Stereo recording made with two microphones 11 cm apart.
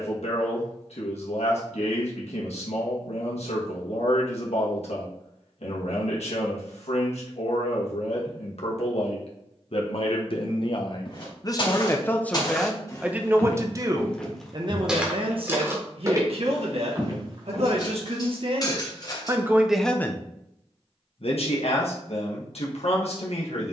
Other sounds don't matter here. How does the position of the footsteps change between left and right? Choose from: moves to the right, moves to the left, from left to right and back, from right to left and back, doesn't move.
moves to the right.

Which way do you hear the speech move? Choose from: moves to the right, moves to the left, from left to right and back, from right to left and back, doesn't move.
from left to right and back.